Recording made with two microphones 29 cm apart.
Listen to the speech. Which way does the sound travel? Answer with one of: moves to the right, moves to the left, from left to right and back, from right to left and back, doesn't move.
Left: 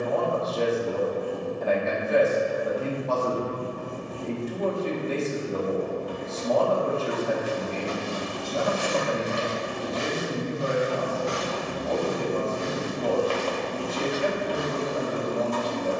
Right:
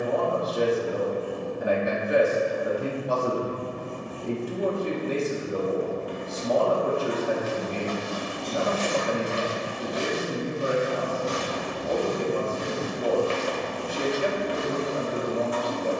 doesn't move.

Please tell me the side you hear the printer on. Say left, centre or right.
left.